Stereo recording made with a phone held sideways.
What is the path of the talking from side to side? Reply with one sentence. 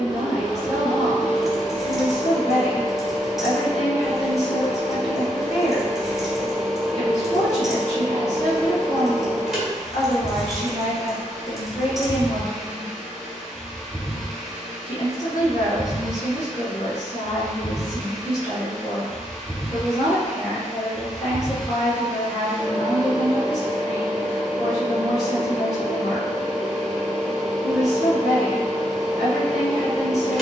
In this clip you hear the talking stay in one place.